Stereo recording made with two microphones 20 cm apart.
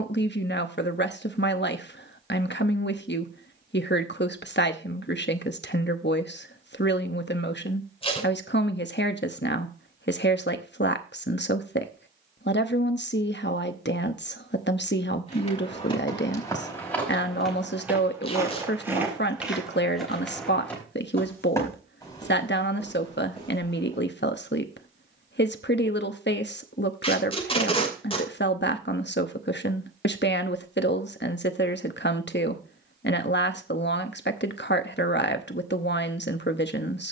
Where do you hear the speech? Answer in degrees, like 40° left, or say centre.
60° left.